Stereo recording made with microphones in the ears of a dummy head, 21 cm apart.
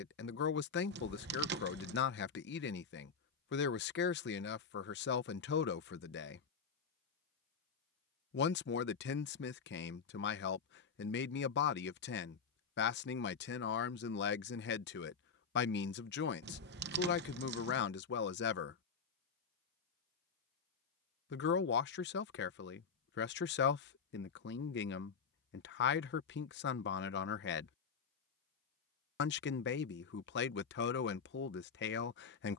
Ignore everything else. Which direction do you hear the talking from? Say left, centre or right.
left.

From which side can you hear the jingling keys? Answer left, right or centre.
right.